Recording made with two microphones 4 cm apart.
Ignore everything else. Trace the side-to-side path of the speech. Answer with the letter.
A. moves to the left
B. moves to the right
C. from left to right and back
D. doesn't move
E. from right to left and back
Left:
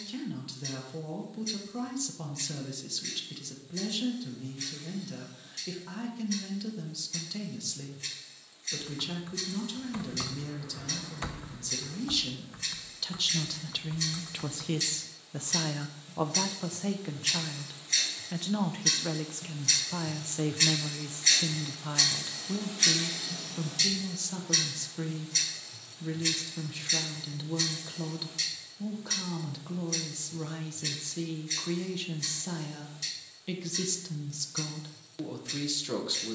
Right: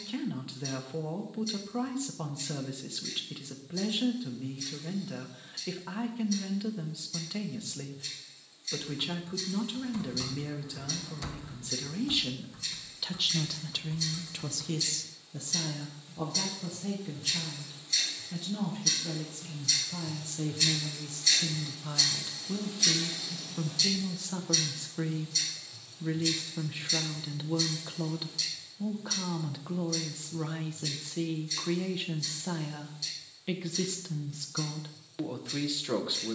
E.